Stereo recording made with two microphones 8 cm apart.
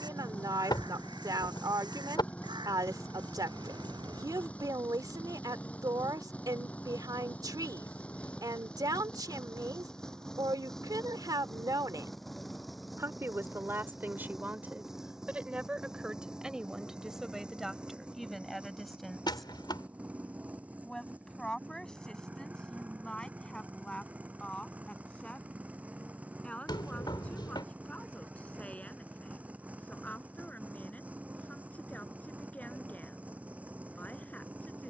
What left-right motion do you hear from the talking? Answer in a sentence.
You can hear the talking move from right to left.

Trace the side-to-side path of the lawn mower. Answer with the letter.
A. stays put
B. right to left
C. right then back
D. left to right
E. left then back
D.